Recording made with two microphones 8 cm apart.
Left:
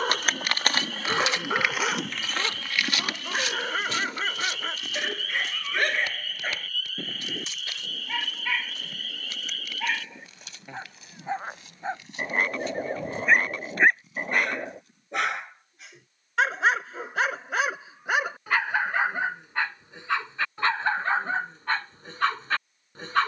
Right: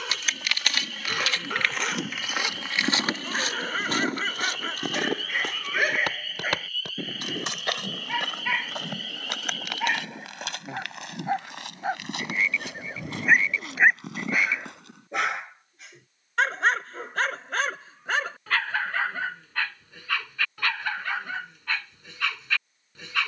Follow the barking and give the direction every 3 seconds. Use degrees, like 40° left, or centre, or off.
30° left, centre, 10° right, 20° right, 10° right, 10° left, 20° left, 40° left.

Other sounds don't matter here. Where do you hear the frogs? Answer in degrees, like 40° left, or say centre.
50° left.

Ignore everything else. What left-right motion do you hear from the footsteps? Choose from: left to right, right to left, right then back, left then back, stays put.
left to right.